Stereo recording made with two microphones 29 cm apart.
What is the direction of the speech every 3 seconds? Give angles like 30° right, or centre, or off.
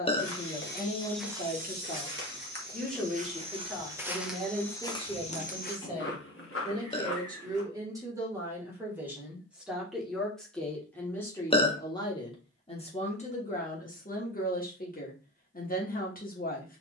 20° left, 10° right, 10° right, centre, 30° left, 30° left.